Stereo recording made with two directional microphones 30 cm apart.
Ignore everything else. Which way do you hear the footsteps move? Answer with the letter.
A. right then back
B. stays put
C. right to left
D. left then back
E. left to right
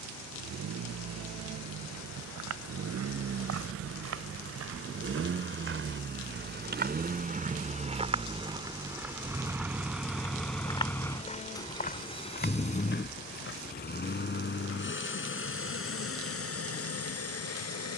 C.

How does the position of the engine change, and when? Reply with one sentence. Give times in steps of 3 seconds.
In this clip you hear the engine on the right from 0 s, in the centre from 9 s and on the left from 12 s.